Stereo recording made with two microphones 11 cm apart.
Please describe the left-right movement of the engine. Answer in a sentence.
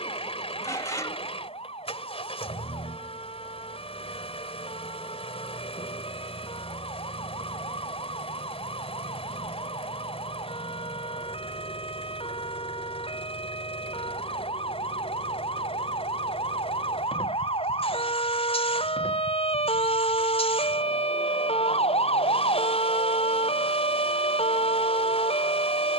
In this clip you hear the engine stay in one place.